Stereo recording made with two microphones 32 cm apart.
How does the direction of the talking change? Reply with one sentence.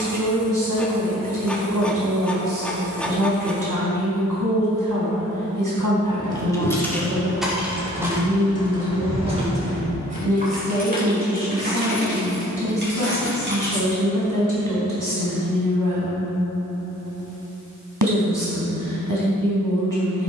You can hear the talking stay in one place.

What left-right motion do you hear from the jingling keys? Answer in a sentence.
You can hear the jingling keys move from left to right.